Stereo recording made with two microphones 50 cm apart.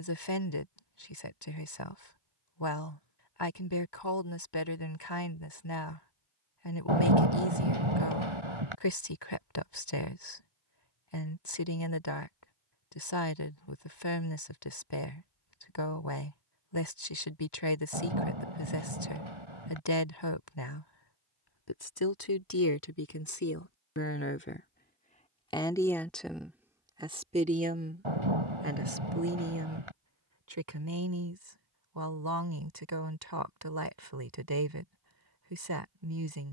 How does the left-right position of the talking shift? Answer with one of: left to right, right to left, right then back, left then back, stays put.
left to right.